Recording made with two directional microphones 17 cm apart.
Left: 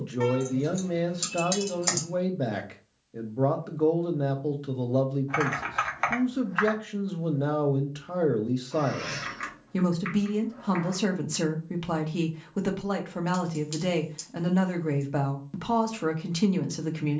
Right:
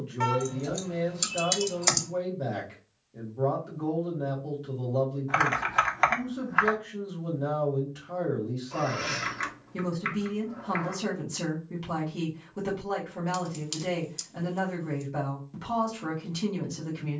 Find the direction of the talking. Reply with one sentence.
In this clip you hear the talking on the left.